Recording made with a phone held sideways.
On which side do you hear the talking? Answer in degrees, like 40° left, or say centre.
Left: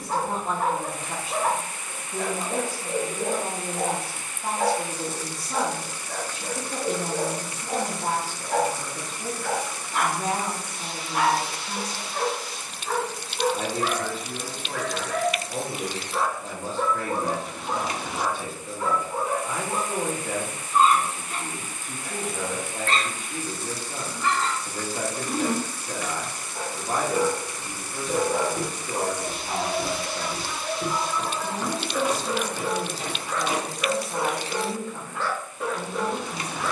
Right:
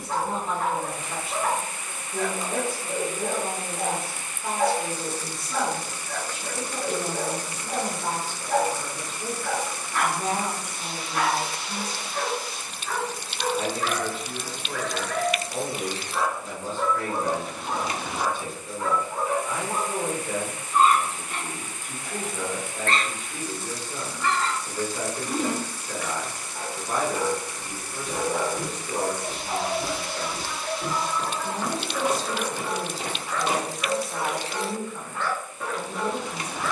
30° left.